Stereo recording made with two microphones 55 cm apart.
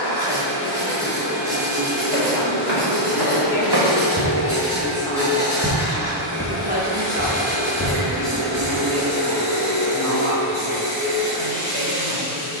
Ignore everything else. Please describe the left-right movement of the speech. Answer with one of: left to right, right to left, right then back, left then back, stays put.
left to right.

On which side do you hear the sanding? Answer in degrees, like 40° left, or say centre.
10° right.